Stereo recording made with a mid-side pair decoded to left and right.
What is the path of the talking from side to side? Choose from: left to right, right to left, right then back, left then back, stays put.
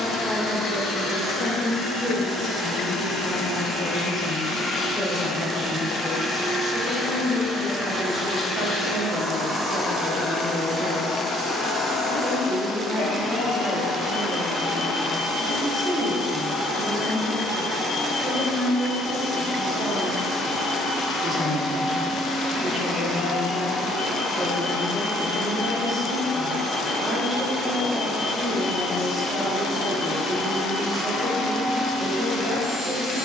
left to right.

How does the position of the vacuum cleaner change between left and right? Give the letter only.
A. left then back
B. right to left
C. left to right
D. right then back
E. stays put
D.